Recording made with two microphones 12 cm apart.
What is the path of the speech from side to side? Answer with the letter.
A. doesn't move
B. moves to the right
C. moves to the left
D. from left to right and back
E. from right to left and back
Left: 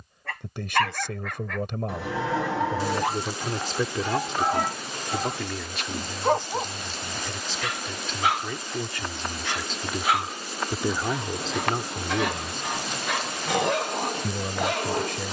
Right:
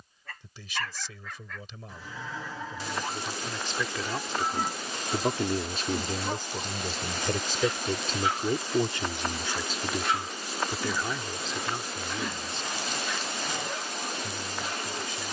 D.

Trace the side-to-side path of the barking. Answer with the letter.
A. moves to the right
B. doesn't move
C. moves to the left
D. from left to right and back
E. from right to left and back
B.